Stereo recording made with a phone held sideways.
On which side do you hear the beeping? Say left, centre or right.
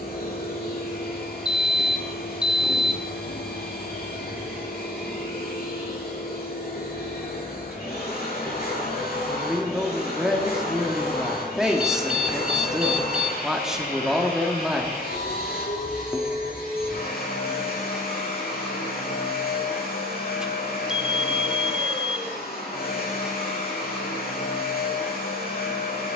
centre.